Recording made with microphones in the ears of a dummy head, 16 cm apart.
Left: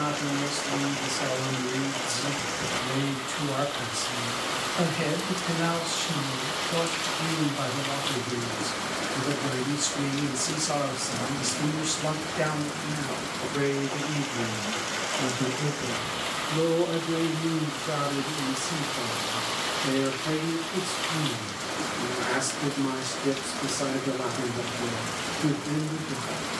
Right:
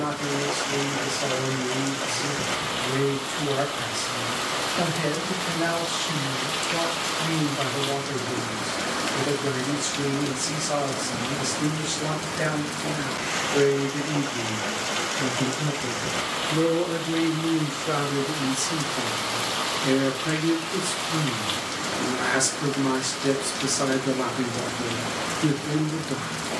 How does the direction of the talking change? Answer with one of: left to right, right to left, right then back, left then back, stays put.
left to right.